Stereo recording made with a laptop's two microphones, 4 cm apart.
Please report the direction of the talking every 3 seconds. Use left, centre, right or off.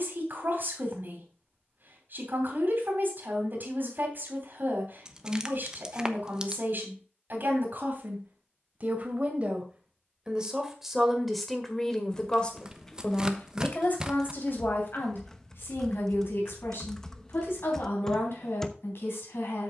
right, right, right, centre, left, left, left.